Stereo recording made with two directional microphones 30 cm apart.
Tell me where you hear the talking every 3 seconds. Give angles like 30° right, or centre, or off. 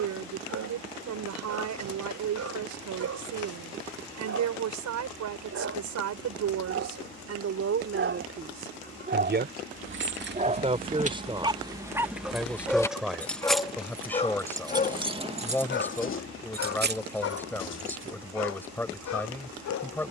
70° right, 70° right, 50° right, 20° right, centre, 10° left, 10° left.